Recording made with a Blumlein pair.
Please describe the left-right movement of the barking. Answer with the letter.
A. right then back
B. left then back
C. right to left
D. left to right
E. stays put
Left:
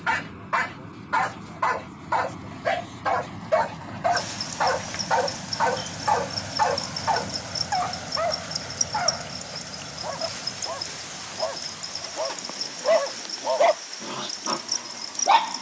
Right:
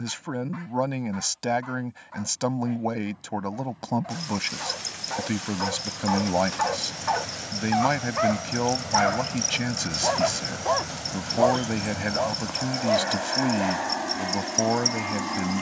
A.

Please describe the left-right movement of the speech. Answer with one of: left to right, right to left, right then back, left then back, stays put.
stays put.